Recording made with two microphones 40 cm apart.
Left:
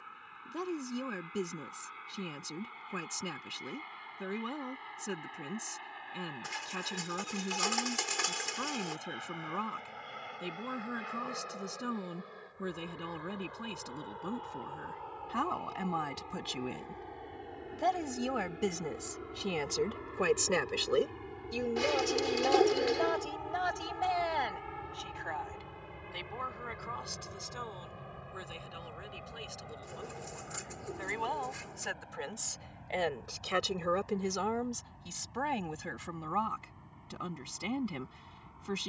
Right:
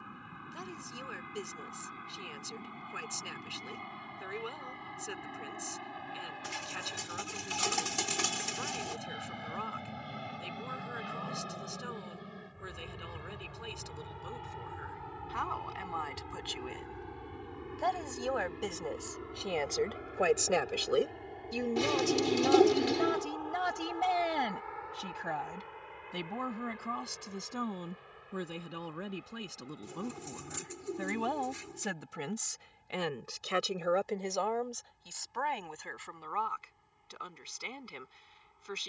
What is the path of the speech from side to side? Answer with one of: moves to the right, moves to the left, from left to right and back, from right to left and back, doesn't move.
from left to right and back.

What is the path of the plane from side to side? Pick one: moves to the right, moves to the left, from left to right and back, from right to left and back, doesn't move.
moves to the left.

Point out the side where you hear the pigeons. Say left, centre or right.
right.